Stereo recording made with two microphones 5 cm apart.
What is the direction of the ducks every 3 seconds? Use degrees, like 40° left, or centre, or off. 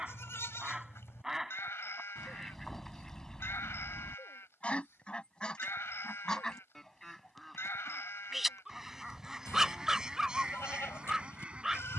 centre, 20° left, 10° left, 20° right.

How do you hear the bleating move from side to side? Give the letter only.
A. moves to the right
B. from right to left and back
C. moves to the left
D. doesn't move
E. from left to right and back
D.